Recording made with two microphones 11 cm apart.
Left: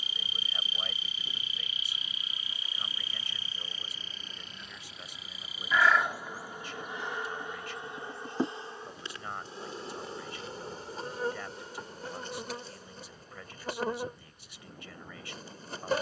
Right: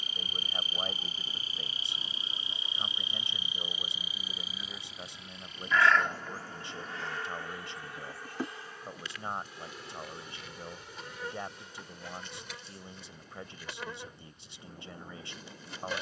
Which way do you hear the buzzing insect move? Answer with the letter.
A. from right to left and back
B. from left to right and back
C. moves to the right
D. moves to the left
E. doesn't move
D.